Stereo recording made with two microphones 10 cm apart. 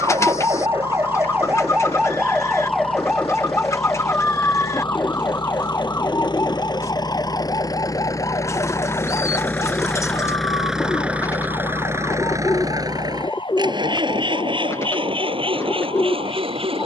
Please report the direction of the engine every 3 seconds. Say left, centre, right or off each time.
left, left, left, centre, right, right.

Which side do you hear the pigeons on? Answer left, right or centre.
left.